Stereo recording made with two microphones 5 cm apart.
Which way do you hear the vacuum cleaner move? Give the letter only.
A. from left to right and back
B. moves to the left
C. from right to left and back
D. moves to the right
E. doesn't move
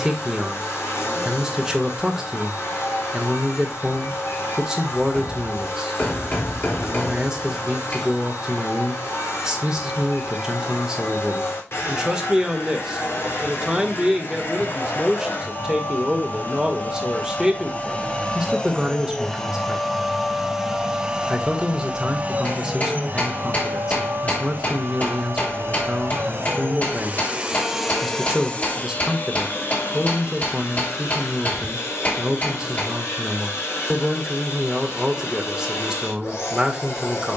A.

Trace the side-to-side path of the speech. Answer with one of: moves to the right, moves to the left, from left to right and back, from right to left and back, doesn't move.
doesn't move.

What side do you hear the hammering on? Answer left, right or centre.
left.